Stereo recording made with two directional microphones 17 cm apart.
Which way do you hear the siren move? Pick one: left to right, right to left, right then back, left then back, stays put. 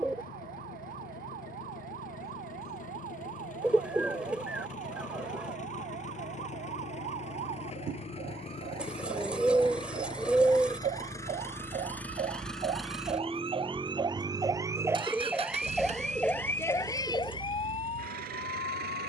right to left.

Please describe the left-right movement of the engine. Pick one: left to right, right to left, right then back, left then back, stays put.
left to right.